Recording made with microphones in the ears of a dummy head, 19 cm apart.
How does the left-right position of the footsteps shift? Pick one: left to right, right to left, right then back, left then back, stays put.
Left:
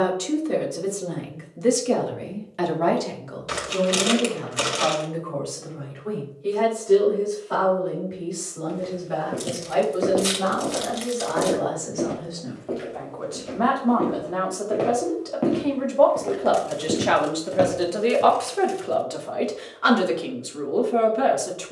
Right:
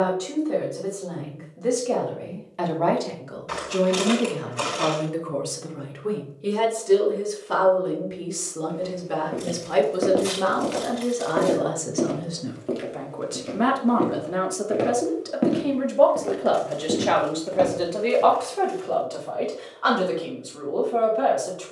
right then back.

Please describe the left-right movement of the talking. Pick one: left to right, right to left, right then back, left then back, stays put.
right then back.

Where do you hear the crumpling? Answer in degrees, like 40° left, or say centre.
50° left.